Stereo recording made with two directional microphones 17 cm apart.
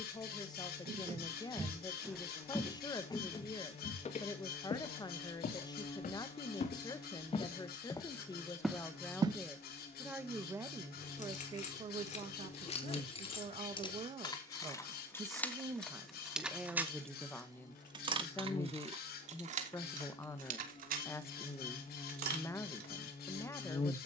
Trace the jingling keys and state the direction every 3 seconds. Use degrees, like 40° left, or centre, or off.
off, off, off, 40° left, 30° left, centre, 40° right, 60° right.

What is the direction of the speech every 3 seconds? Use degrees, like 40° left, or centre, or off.
20° left, 20° left, 20° left, 10° right, 40° right, 10° right, 20° left, 20° left.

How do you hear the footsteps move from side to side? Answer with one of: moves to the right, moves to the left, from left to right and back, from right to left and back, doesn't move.
from right to left and back.